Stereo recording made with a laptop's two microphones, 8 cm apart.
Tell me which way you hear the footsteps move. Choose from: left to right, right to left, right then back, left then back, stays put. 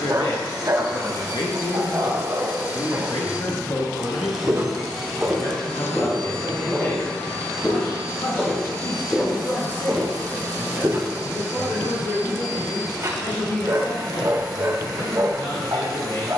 left then back.